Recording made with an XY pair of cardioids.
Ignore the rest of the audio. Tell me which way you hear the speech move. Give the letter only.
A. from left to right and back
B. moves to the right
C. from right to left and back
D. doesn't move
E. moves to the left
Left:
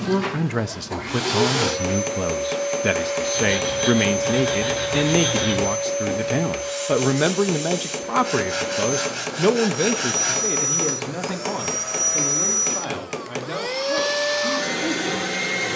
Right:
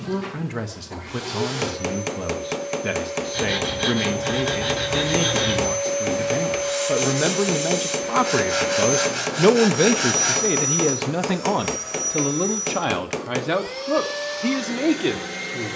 B.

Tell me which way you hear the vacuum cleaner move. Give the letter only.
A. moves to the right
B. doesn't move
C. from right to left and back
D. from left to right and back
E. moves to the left
D.